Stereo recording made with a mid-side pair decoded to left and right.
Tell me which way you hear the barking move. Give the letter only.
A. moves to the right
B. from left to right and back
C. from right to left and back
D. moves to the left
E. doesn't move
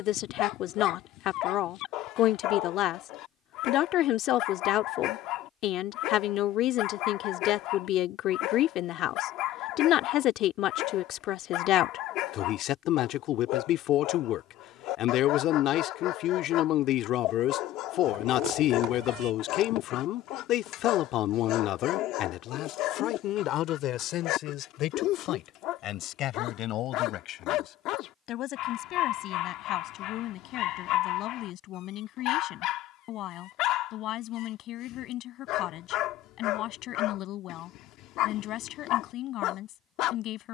E.